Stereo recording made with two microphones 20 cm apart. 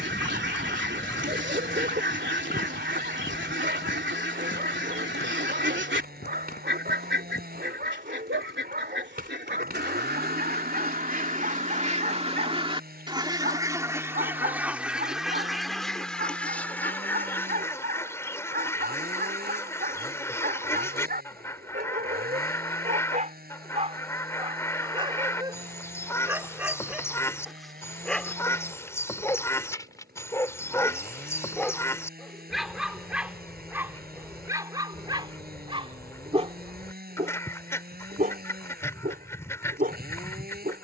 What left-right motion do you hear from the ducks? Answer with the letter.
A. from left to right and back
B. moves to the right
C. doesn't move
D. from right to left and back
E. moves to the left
E.